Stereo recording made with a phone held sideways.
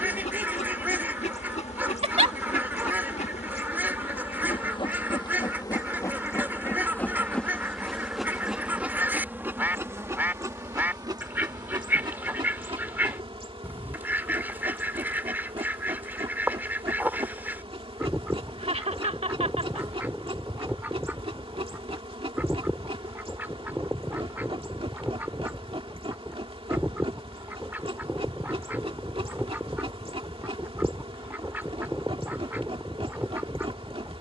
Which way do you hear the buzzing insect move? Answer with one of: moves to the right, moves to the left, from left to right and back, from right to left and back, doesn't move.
moves to the right.